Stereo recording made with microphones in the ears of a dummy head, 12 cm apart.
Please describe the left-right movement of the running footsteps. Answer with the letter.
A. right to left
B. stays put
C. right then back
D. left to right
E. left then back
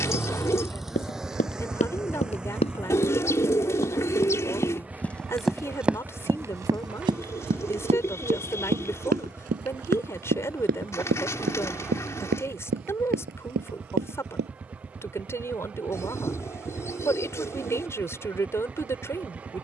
D.